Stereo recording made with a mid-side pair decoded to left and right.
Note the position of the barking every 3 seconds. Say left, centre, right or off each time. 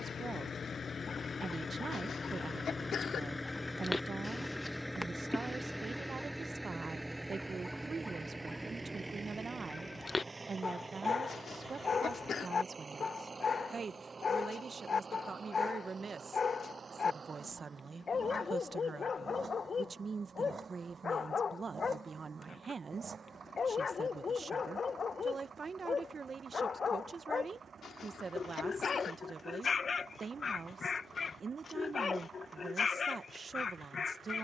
left, centre, centre, left, left, left, left, left, left, left, left, left.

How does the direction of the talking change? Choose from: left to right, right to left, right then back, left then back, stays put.
stays put.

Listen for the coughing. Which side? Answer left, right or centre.
left.